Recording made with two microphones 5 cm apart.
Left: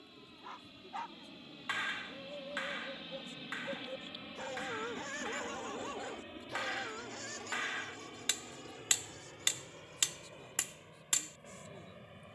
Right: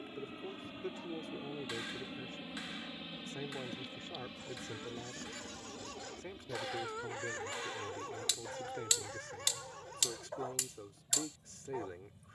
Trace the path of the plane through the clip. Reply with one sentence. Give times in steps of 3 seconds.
You can hear the plane on the right from 0 s, in the centre from 3 s and on the left from 6 s.